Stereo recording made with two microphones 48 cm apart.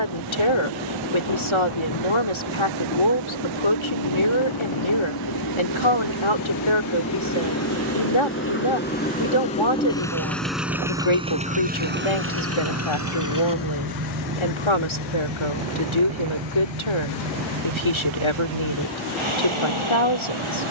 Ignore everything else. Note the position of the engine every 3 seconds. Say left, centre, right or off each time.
left, left, left, centre, right, right, right.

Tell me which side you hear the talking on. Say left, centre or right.
left.